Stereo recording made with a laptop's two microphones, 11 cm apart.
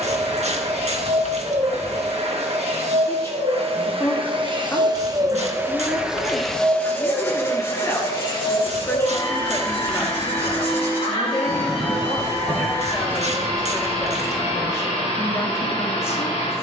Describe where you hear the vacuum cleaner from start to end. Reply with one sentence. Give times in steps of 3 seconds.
In this clip you hear the vacuum cleaner on the right from 0 s and on the left from 6 s.